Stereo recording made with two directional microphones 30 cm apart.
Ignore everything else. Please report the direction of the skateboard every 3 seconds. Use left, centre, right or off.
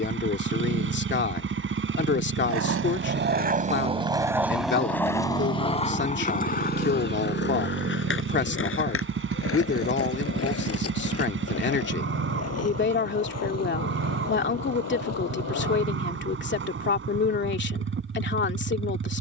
right, centre, left, left, left, left, off.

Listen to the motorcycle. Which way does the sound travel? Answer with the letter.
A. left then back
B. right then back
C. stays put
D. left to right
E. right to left
C.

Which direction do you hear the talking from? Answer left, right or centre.
left.